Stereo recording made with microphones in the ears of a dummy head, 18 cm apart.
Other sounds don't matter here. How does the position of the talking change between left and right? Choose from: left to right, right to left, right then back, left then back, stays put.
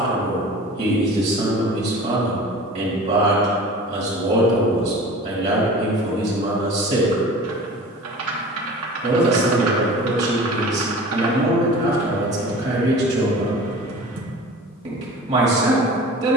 stays put.